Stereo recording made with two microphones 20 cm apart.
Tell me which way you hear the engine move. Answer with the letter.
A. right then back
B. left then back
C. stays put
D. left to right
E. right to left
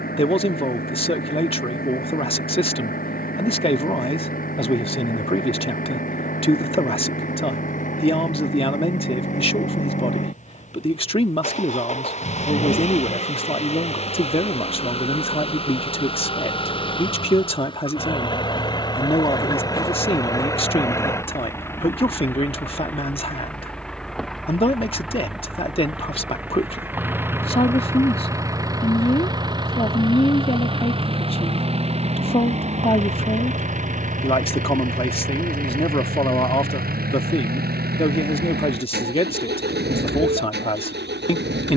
D.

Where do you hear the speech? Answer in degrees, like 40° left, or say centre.
30° left.